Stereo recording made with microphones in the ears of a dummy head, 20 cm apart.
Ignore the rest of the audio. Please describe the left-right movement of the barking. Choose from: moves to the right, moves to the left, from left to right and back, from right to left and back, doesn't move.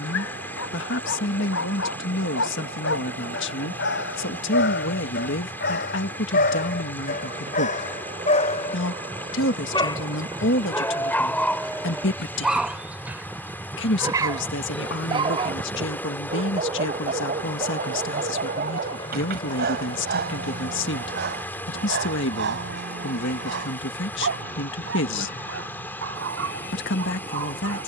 moves to the right.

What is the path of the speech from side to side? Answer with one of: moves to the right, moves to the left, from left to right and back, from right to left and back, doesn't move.
doesn't move.